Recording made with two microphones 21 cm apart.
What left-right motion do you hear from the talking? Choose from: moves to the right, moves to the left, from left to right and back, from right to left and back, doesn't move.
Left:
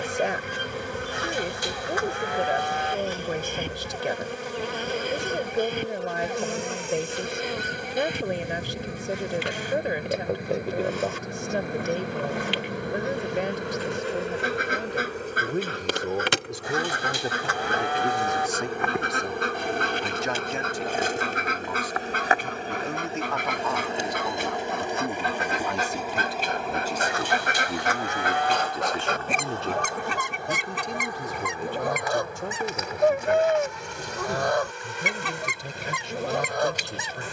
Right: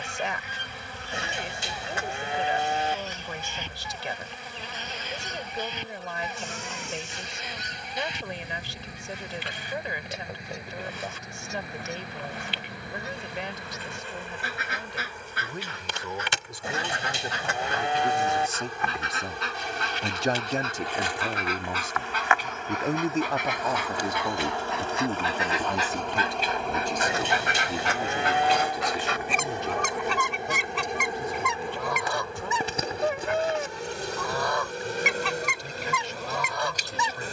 from left to right and back.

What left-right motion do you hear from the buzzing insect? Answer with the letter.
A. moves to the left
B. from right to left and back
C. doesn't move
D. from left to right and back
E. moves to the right
E.